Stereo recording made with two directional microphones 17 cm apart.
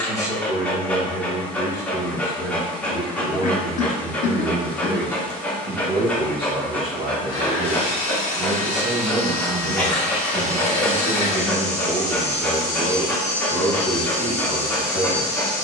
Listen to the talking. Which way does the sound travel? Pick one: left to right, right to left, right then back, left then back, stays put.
right then back.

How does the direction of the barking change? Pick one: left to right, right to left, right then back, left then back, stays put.
stays put.